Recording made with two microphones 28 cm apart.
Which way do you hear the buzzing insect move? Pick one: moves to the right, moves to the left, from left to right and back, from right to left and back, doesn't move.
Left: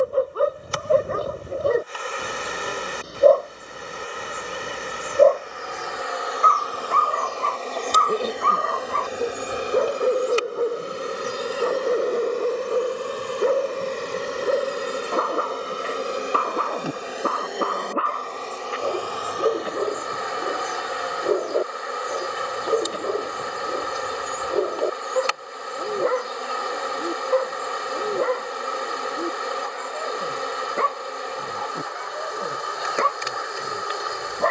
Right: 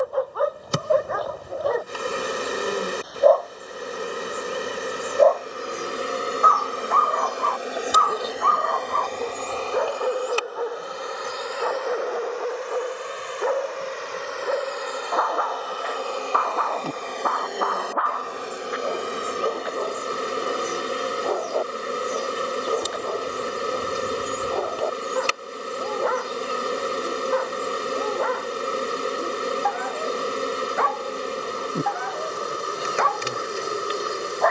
from right to left and back.